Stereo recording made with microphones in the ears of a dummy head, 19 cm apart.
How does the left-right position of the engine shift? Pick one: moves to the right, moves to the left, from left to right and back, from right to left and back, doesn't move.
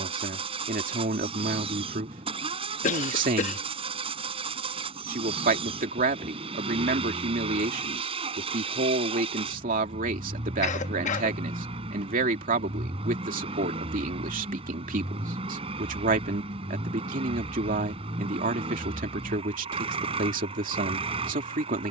doesn't move.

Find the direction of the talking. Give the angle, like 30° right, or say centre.
40° right.